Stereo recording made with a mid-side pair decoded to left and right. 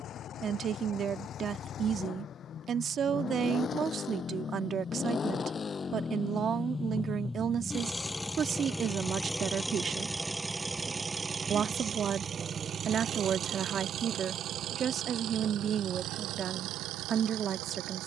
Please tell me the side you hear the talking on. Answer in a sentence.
In this clip you hear the talking on the right.